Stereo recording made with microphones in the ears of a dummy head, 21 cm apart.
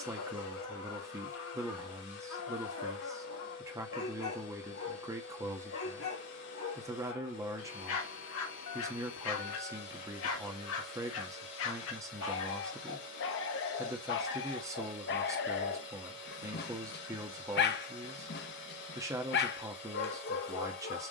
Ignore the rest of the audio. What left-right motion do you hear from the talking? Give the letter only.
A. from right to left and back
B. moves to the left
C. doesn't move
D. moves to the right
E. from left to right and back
C.